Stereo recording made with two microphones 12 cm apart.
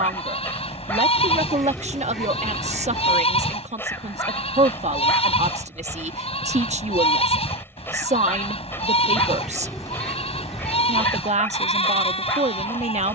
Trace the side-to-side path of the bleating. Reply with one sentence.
You can hear the bleating stay put.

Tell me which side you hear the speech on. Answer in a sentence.
You can hear the speech on the right.